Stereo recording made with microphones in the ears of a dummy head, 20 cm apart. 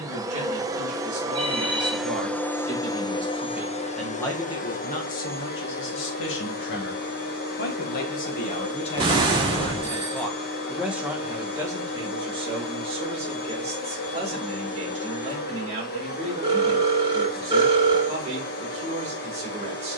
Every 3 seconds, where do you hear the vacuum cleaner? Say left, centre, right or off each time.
centre, left, left, left, left, left, left.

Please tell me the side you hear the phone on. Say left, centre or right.
right.